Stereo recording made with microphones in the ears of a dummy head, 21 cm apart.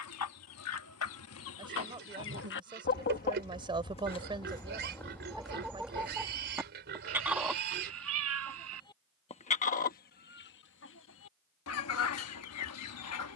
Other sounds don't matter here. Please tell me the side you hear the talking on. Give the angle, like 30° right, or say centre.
20° right.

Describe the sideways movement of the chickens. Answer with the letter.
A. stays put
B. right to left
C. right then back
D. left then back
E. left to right
C.